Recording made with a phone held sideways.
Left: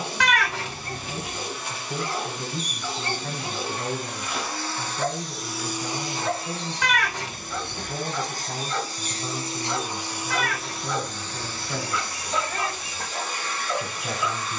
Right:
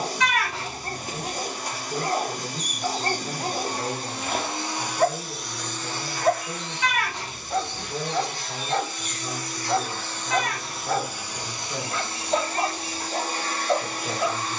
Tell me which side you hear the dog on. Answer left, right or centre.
right.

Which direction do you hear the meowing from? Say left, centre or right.
left.